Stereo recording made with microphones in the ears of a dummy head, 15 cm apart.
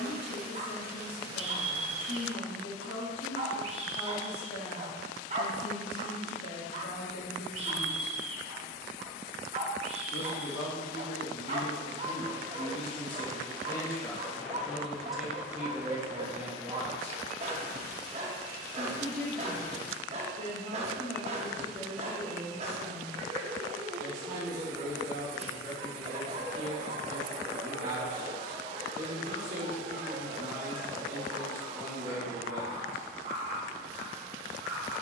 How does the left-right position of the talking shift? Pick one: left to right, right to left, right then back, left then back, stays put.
left to right.